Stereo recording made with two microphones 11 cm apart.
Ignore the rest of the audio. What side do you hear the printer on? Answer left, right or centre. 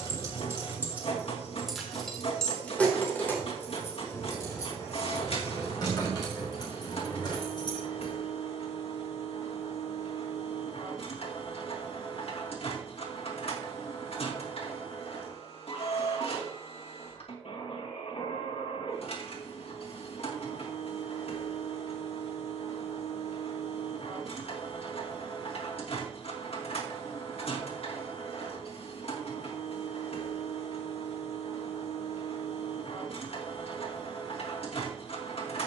left.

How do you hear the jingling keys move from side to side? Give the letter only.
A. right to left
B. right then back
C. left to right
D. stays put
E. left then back
A.